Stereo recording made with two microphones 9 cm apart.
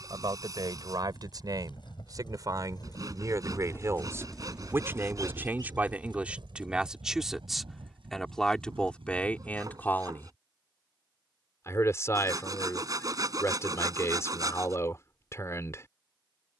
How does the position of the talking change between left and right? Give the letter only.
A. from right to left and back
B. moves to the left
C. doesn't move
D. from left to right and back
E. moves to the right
B.